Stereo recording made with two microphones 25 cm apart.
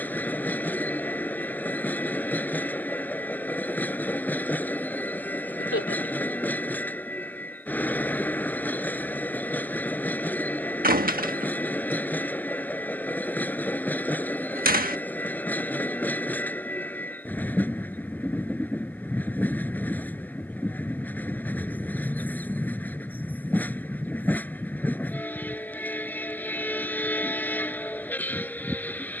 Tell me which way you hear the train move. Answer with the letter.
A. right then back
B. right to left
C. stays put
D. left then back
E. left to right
C.